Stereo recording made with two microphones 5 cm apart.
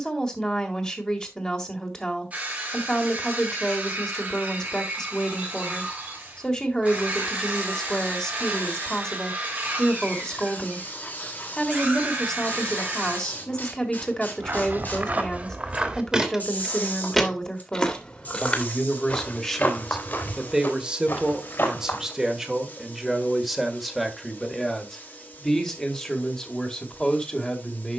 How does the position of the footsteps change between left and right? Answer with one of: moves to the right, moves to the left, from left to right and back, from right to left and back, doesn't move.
moves to the left.